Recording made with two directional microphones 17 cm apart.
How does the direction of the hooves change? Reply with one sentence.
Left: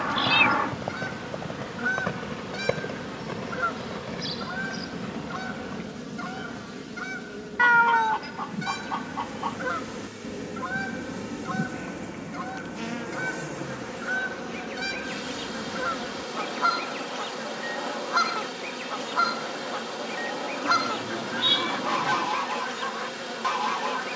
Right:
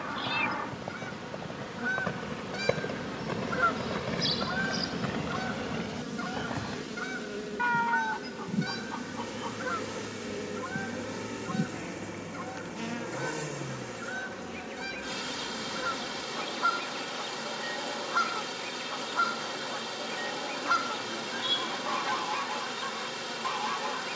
You can hear the hooves move to the right.